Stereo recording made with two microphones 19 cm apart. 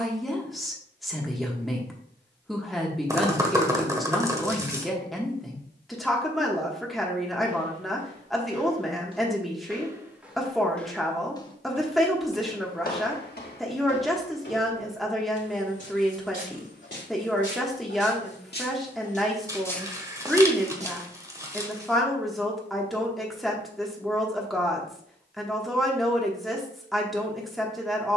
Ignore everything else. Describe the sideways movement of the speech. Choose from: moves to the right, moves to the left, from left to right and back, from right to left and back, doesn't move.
doesn't move.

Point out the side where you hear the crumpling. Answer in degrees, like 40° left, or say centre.
20° right.